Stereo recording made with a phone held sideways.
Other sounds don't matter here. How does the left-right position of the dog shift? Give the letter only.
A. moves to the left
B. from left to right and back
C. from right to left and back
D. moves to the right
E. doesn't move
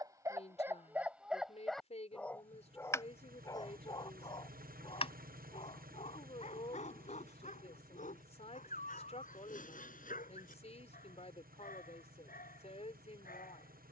A.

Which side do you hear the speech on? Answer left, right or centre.
left.